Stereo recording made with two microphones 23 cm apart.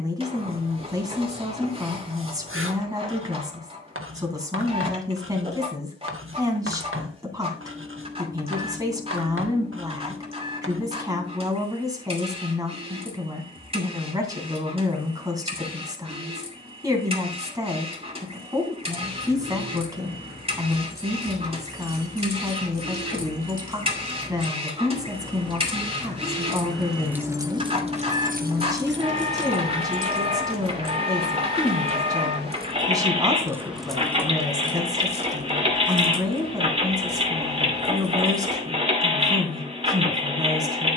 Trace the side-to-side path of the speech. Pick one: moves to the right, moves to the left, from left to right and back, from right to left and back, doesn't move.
doesn't move.